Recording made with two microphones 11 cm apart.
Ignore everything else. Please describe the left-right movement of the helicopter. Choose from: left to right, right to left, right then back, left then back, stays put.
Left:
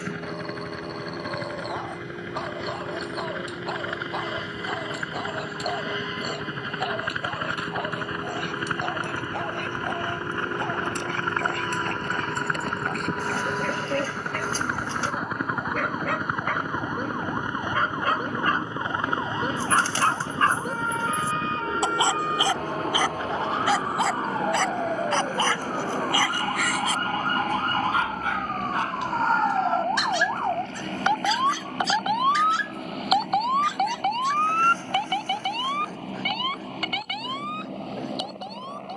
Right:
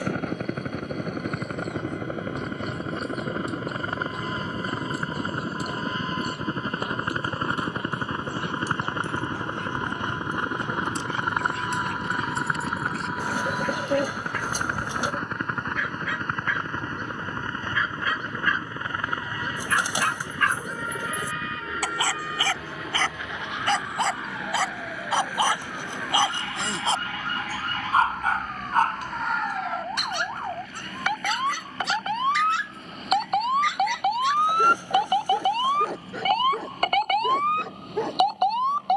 right to left.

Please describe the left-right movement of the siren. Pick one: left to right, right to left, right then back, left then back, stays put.
left to right.